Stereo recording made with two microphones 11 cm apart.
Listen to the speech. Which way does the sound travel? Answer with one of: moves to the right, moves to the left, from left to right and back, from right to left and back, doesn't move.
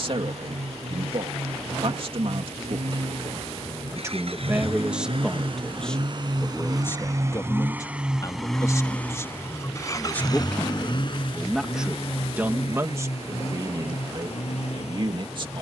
from right to left and back.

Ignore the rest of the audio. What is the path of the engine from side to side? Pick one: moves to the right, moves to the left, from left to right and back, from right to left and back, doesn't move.
moves to the left.